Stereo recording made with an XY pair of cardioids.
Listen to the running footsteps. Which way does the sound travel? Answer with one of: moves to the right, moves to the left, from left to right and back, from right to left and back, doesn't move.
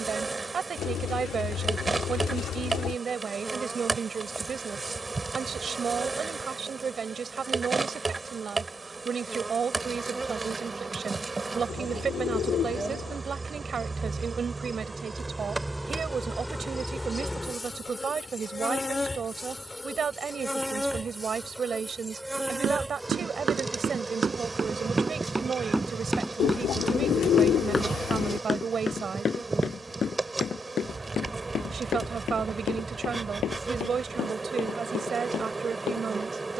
moves to the left.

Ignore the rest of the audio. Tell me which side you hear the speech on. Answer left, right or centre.
right.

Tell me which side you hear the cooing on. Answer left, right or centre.
left.